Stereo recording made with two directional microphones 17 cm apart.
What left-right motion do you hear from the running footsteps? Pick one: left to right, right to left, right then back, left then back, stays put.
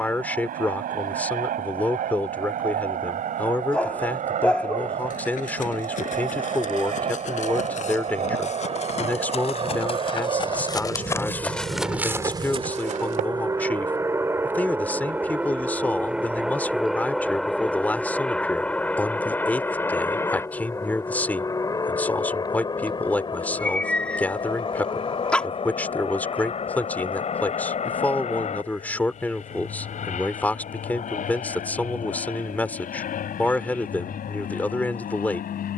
left to right.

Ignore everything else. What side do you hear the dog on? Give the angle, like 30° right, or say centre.
10° left.